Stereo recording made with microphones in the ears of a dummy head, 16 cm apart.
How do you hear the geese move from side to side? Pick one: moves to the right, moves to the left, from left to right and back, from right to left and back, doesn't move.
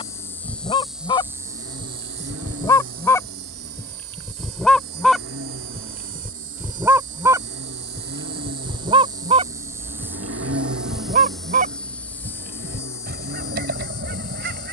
moves to the right.